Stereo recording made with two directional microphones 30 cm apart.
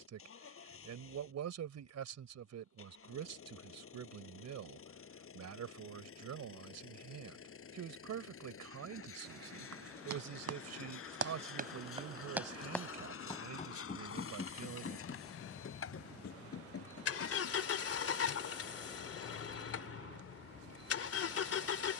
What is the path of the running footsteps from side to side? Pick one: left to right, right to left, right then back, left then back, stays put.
right to left.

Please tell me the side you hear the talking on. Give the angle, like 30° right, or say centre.
60° right.